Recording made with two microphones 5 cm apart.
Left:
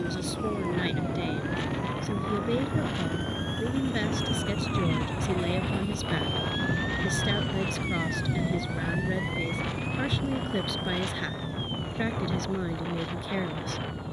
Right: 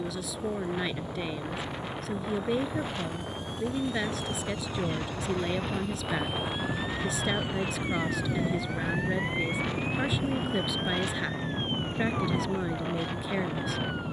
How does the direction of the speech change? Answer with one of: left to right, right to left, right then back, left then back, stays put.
stays put.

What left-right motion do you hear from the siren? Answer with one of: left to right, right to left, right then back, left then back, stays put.
left to right.